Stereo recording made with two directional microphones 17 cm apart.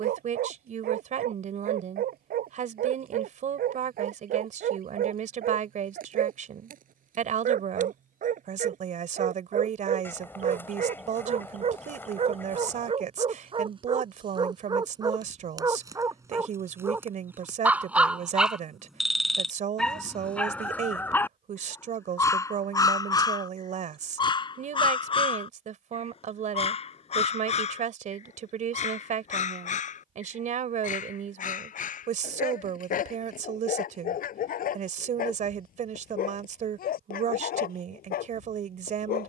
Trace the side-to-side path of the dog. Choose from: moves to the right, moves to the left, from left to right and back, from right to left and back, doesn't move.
moves to the left.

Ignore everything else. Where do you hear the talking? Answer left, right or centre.
right.